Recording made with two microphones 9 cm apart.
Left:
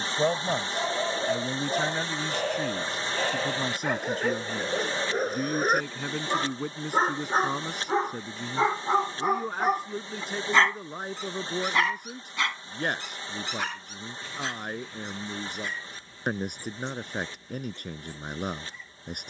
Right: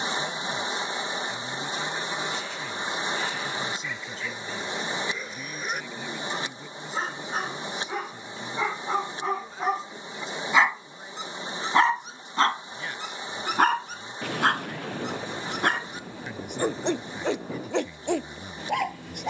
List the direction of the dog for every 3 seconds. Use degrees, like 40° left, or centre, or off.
60° left, 50° left, 30° left, 10° right, 50° right, 70° right, 80° right.